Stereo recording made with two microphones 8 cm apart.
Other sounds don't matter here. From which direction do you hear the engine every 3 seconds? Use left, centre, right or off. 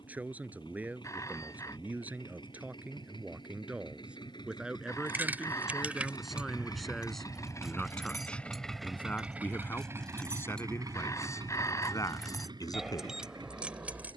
left, left, left, right, right.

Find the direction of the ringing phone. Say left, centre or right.
left.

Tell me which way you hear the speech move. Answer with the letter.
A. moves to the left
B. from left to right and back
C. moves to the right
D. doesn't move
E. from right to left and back
A.